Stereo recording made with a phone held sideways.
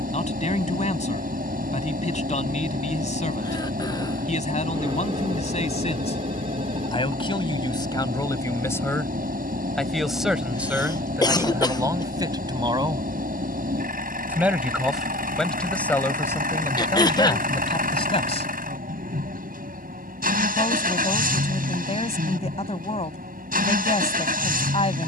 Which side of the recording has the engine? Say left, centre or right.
right.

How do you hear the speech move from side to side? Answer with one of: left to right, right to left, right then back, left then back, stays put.
right then back.